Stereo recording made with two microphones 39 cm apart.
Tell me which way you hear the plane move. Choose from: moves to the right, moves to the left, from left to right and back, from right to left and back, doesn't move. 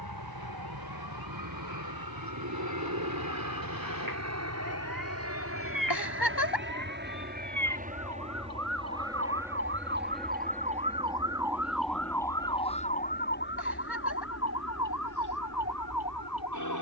moves to the left.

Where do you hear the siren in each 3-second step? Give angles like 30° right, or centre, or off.
70° right, 60° right, 50° right, 20° right, 30° left, 50° left.